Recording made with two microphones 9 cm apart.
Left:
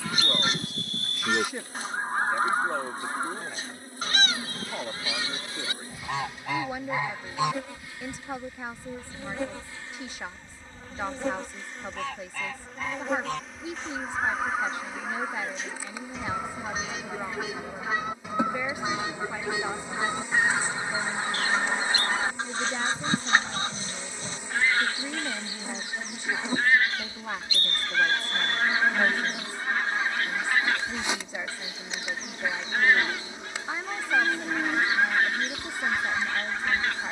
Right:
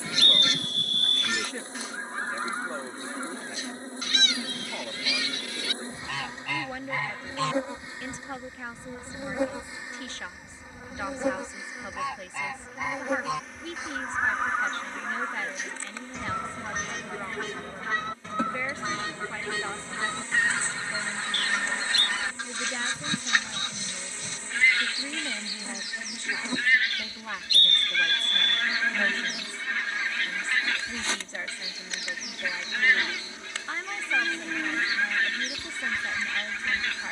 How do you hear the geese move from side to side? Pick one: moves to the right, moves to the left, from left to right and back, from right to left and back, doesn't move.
from left to right and back.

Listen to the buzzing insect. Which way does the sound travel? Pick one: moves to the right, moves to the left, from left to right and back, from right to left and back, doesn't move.
moves to the left.